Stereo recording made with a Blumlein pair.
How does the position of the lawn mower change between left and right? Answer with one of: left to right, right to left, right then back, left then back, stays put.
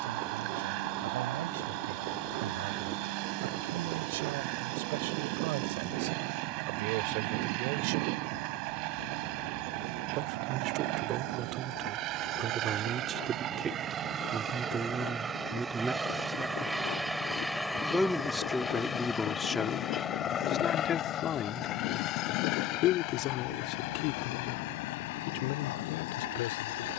right to left.